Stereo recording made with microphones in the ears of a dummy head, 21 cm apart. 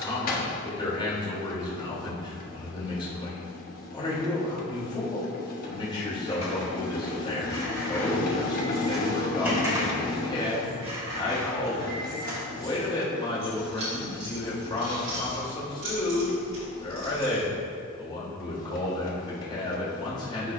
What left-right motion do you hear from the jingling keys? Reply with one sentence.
You can hear the jingling keys move from left to right.